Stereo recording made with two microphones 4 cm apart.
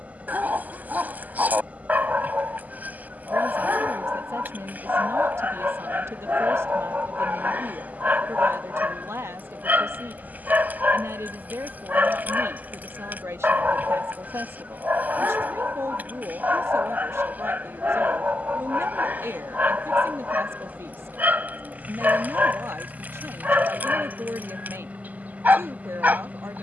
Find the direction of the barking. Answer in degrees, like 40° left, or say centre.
40° right.